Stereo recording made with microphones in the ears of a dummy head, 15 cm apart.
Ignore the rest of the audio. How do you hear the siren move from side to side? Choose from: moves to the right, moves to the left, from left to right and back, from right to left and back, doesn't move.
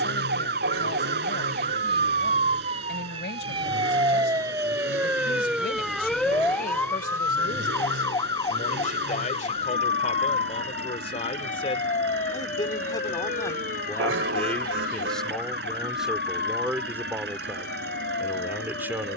moves to the left.